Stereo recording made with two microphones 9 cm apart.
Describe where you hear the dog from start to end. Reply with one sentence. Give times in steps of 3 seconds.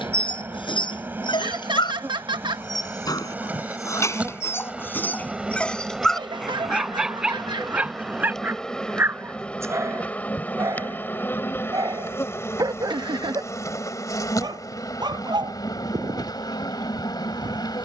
You can hear the dog on the left from 0 s, in the centre from 6 s and on the right from 9 s.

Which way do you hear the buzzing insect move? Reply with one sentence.
You can hear the buzzing insect travel towards the left.